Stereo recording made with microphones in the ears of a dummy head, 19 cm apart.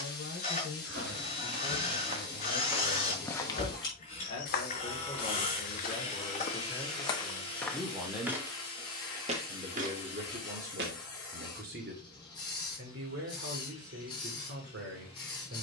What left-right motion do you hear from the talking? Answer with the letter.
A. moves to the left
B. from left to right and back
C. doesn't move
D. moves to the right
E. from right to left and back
D.